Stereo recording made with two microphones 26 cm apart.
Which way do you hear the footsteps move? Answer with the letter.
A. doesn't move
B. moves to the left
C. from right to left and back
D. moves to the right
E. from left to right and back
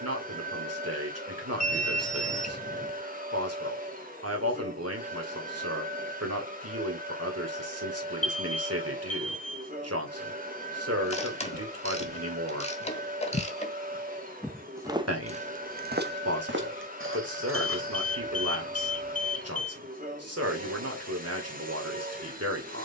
D.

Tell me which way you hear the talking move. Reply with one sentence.
You can hear the talking stay in one place.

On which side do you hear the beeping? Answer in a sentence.
You can hear the beeping on the left.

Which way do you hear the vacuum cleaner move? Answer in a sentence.
In this clip you hear the vacuum cleaner stay in one place.